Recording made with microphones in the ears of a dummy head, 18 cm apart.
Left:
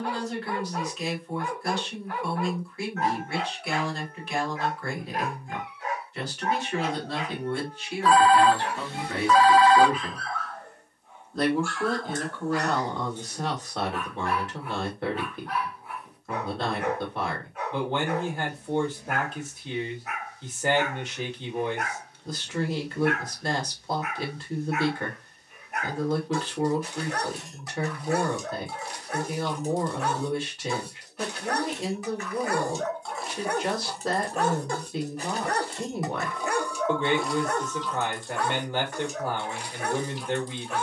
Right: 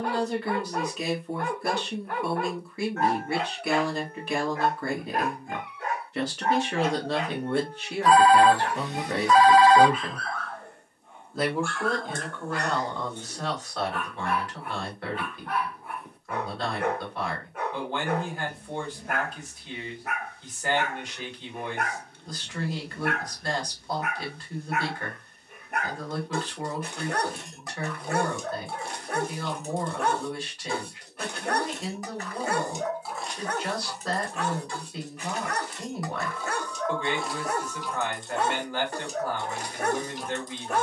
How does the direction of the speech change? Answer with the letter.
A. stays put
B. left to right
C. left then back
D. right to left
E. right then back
D.